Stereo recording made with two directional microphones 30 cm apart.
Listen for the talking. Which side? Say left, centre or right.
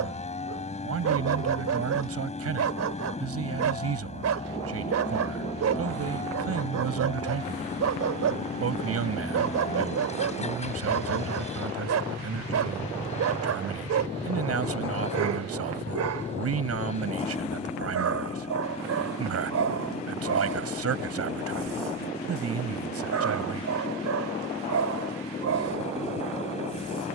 right.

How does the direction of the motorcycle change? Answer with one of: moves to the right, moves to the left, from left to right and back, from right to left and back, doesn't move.
doesn't move.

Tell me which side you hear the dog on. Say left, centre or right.
right.